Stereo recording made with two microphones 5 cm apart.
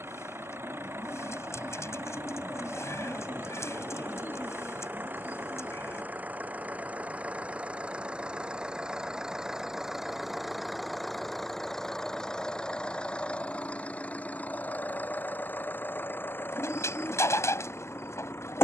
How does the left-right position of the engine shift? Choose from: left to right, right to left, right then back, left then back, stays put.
right to left.